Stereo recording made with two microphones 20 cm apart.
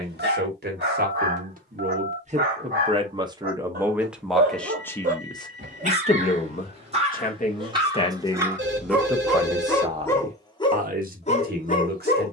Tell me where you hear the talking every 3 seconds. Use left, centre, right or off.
right, centre, left, right.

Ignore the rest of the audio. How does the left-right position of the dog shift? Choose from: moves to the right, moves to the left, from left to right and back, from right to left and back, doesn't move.
moves to the left.